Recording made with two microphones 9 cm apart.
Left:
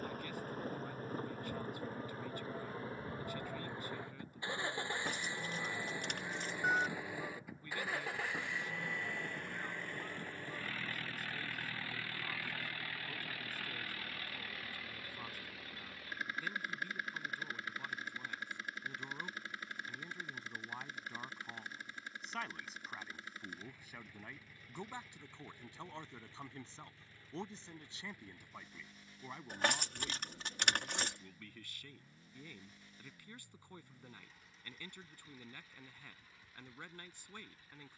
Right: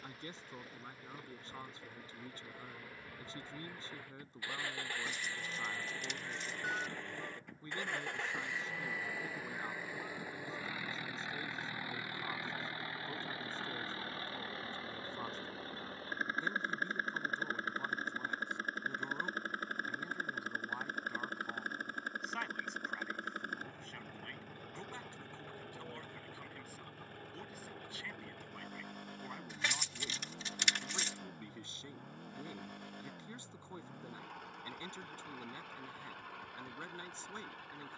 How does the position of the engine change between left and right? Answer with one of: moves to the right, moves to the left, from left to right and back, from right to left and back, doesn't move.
moves to the right.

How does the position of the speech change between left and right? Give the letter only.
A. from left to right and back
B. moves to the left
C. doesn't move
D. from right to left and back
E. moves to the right
D.